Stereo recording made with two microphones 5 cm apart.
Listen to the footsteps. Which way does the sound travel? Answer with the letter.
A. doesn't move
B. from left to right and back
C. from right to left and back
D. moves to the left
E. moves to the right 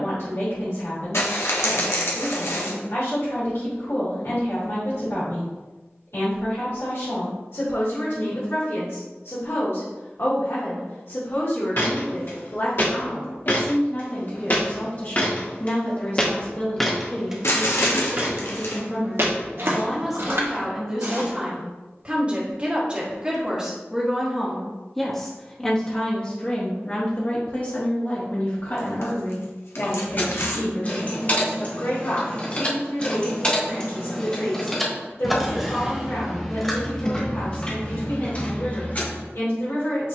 E.